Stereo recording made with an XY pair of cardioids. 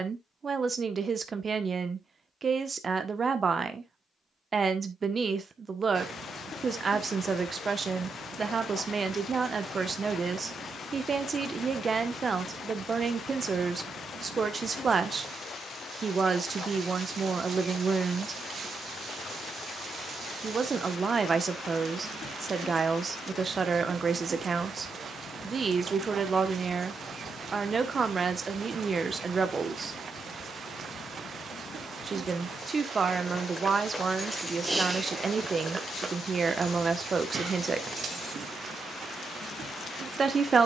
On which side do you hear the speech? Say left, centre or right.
right.